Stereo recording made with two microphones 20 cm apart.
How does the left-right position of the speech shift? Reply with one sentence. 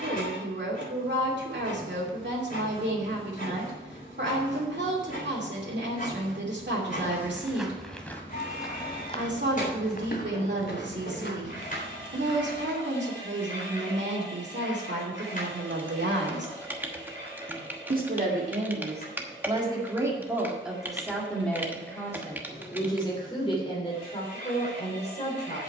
In this clip you hear the speech move from right to left.